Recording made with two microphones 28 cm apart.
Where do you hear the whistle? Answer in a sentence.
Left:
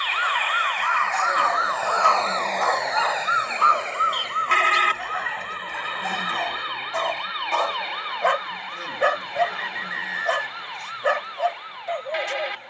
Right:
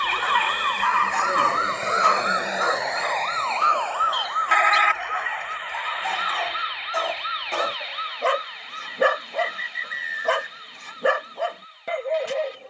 You can hear the whistle on the right.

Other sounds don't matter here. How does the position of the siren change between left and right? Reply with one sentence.
In this clip you hear the siren move to the left.